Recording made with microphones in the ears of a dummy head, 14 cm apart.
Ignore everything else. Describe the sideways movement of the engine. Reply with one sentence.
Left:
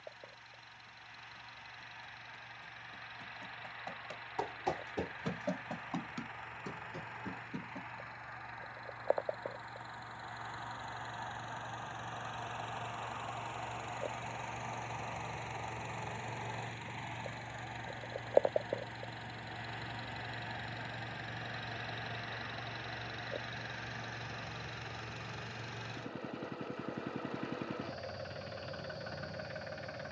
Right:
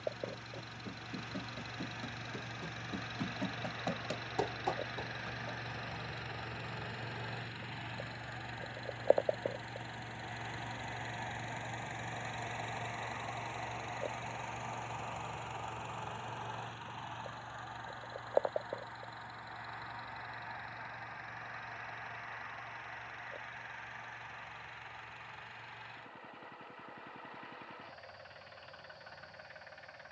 You can hear the engine go from the right side to the left.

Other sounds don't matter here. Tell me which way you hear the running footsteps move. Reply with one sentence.
In this clip you hear the running footsteps move from right to left.